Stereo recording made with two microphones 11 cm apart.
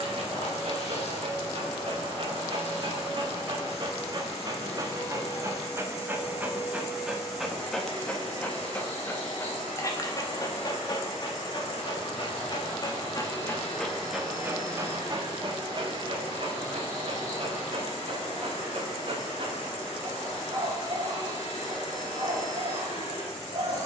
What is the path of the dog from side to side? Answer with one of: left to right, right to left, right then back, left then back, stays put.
left then back.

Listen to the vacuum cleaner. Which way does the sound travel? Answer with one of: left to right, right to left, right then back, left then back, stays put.
stays put.